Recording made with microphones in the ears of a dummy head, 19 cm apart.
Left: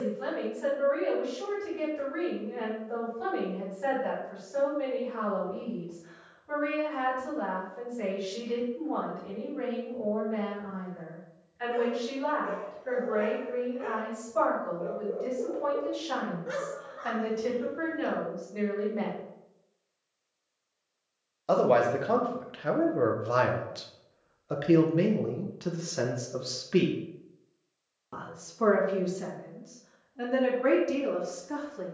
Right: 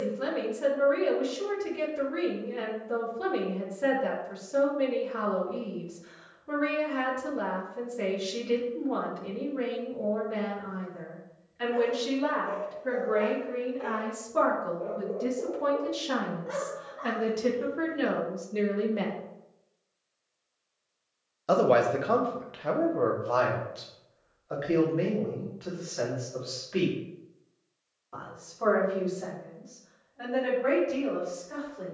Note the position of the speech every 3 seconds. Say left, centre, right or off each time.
right, right, right, right, right, right, right, centre, left, left, left.